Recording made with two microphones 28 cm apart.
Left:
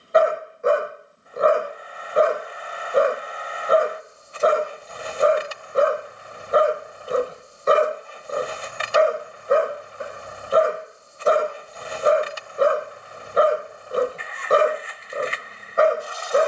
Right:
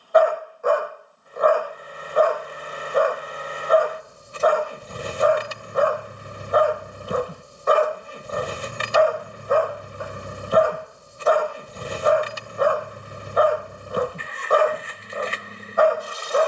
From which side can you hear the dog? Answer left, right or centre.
left.